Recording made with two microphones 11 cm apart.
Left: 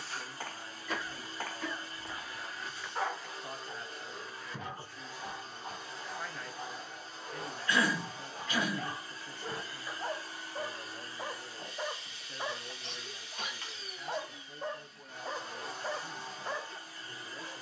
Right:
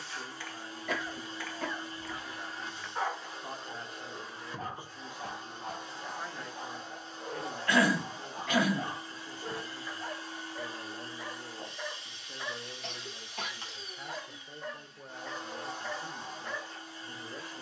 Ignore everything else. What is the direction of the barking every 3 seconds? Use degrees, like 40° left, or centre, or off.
40° left, 30° right, 40° right, 10° left, 30° left, 30° left.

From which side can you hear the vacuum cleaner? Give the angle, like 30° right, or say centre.
20° right.